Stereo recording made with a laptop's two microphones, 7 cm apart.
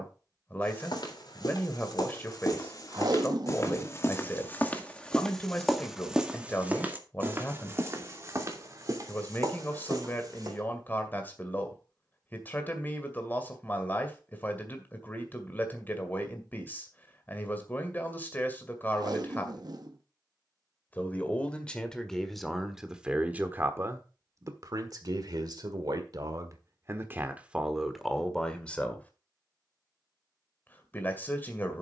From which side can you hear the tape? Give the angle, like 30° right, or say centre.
60° right.